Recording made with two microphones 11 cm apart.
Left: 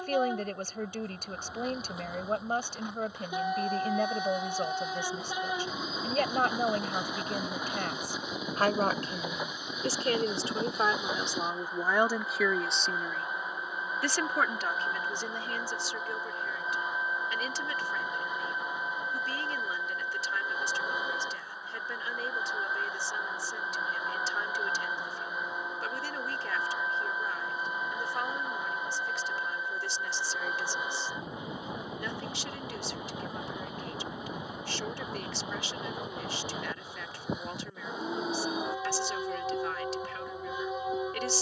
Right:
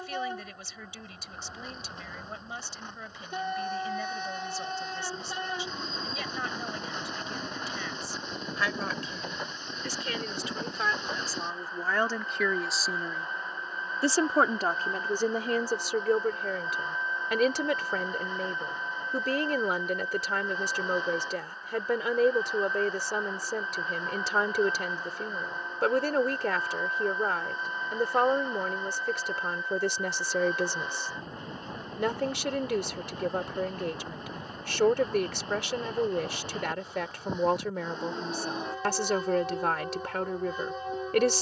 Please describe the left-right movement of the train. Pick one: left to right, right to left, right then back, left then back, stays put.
stays put.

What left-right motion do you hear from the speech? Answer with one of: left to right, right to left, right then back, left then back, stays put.
left to right.